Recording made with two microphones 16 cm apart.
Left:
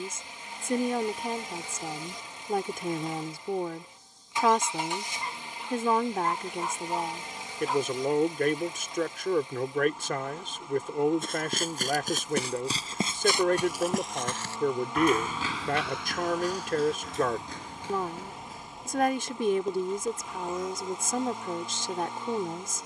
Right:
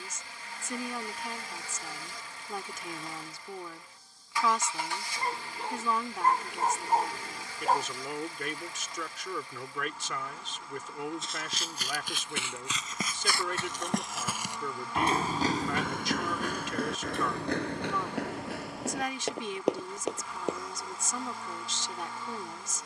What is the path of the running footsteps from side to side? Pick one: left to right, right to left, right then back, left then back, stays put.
left to right.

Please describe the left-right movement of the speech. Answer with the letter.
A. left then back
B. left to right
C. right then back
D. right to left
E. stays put
E.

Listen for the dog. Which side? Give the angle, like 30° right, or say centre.
50° right.